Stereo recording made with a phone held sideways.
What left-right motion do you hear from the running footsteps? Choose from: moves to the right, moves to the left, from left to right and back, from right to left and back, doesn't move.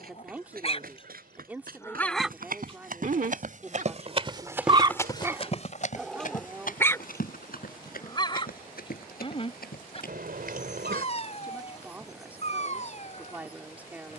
moves to the left.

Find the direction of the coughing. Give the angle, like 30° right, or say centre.
80° right.